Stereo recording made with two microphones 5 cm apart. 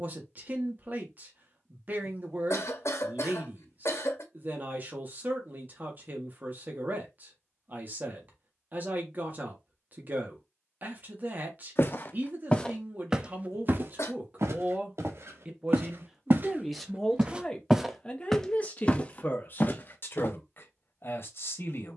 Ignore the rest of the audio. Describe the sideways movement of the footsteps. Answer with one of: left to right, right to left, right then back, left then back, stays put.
right then back.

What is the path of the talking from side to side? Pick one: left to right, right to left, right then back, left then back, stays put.
right to left.